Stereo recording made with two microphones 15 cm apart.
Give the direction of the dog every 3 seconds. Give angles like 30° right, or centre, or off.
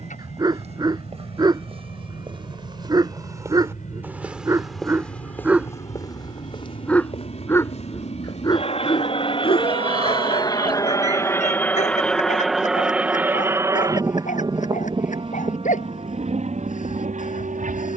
30° right, 20° right, 20° left, 50° left, 60° left, 60° left.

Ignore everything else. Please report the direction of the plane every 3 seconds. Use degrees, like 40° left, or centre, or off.
70° left, 70° left, 50° left, 30° left, 10° right, 50° right.